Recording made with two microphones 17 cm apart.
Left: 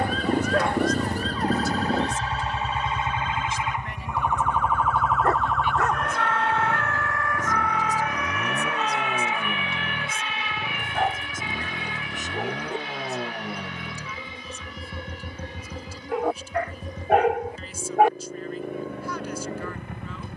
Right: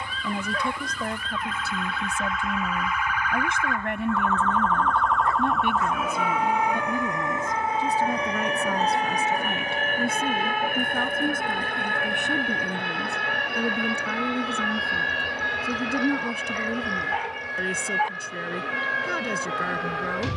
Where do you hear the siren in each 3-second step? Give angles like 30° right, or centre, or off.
40° left, 10° left, 20° right, 50° right, 60° right, 70° right, 80° right.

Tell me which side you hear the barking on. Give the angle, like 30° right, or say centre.
70° left.